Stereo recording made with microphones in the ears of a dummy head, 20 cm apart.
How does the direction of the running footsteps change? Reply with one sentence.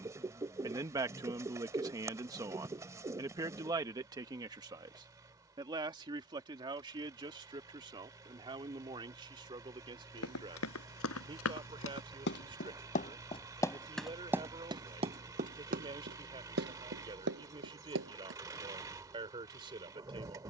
In this clip you hear the running footsteps travel towards the right.